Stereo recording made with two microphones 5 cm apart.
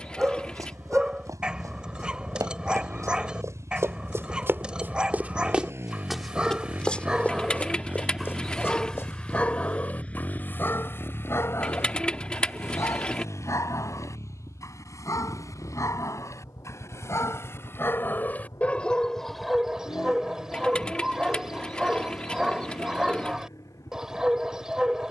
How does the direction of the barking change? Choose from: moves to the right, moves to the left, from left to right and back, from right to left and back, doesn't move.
from right to left and back.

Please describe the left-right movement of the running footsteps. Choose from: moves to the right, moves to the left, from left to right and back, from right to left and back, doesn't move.
moves to the left.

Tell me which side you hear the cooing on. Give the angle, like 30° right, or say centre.
20° left.